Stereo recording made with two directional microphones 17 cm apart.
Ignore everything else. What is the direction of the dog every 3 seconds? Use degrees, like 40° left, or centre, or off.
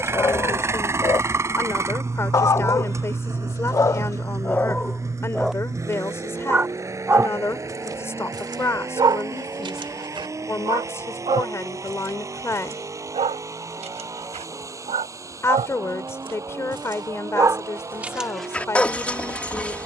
20° left, 10° left, 20° right, 30° right, 40° right, 30° right, 10° left.